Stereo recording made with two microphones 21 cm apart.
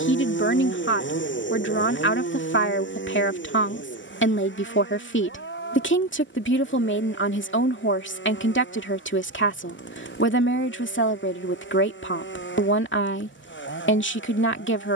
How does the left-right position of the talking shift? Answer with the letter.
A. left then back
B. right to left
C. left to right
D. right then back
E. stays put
E.